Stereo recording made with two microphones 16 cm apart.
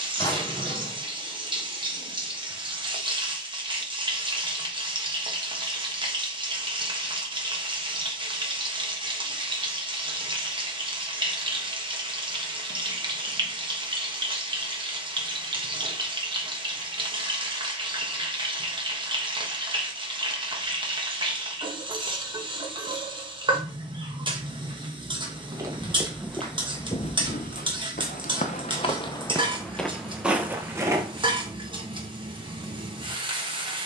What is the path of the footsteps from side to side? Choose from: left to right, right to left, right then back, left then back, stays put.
left then back.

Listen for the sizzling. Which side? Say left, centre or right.
right.